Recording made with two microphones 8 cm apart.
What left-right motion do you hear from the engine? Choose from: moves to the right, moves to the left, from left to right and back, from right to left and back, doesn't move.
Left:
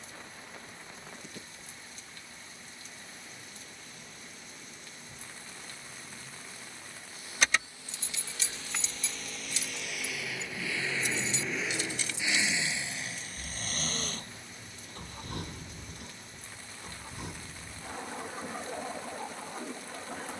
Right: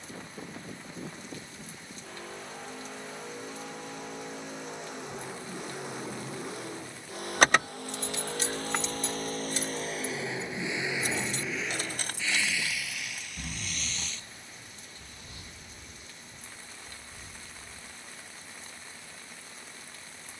moves to the left.